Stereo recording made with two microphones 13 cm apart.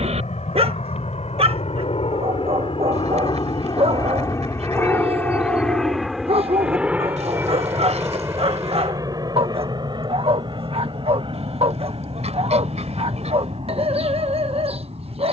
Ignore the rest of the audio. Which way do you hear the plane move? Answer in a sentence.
In this clip you hear the plane move to the right.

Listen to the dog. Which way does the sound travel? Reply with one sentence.
You can hear the dog stay put.